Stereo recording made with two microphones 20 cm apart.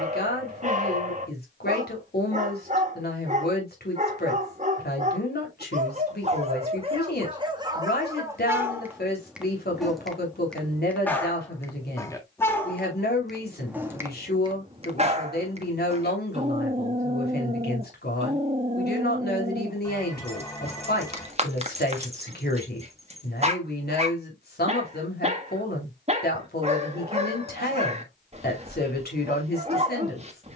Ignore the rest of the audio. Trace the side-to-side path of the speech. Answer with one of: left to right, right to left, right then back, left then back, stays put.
stays put.